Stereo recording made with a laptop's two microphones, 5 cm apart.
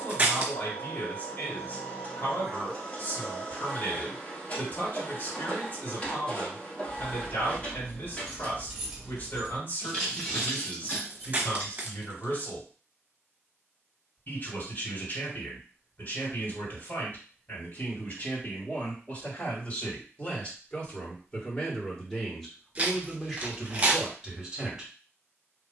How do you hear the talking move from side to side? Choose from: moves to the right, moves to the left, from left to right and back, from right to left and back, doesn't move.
moves to the right.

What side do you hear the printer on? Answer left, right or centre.
left.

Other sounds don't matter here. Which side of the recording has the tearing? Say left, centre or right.
right.